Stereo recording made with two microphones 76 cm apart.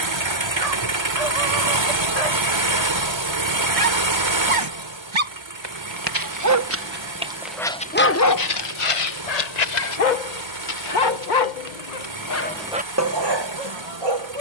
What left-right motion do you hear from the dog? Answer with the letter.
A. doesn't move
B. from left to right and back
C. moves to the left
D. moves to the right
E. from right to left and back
E.